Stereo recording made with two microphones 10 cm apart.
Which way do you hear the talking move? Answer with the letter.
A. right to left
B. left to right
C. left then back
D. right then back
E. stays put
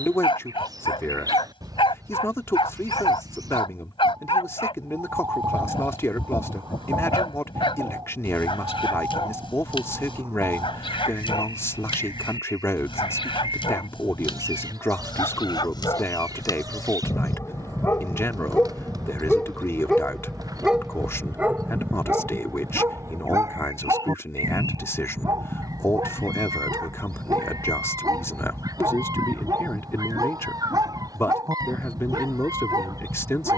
E.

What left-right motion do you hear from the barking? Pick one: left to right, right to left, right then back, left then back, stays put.
left to right.